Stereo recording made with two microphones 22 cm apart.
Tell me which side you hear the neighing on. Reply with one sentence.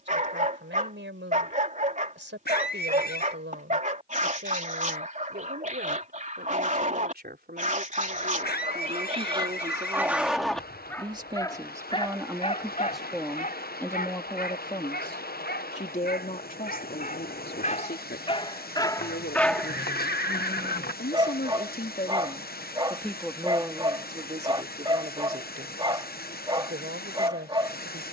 In this clip you hear the neighing on the left.